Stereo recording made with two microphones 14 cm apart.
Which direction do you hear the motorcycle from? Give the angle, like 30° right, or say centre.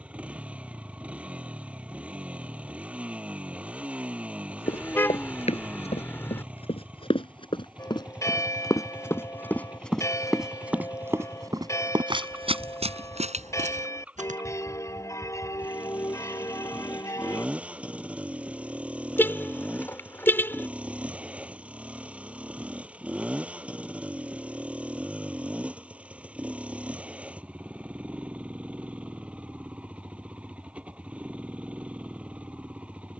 10° right.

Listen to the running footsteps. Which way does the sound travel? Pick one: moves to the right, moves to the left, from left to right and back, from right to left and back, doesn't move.
moves to the right.